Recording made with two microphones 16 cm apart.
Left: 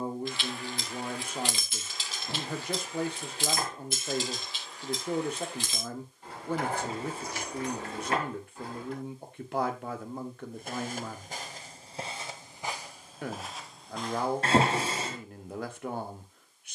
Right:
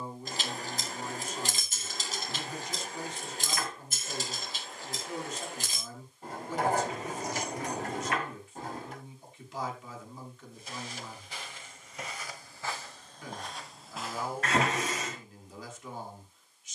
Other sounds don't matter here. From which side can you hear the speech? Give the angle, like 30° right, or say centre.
60° left.